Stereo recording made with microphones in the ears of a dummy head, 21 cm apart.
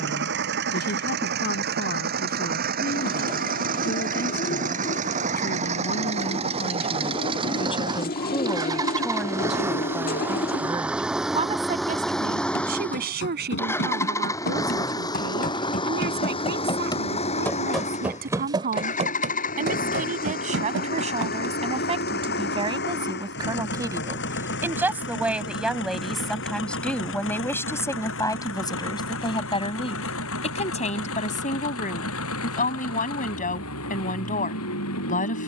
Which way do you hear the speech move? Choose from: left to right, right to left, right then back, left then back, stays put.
right then back.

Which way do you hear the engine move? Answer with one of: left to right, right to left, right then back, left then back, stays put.
right to left.